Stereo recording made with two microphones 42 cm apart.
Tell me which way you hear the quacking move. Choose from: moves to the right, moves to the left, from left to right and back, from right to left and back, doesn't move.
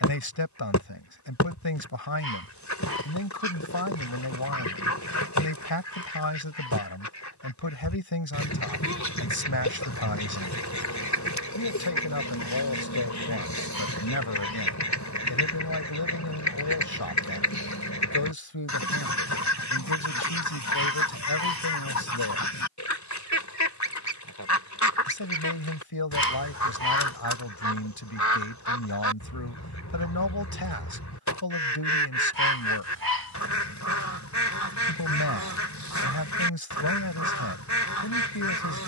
doesn't move.